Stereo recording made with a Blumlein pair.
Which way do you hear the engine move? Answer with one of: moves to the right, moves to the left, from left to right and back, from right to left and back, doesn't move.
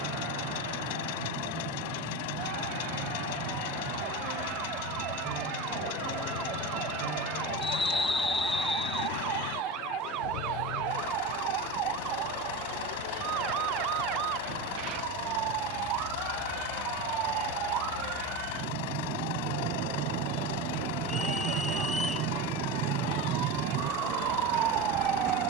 doesn't move.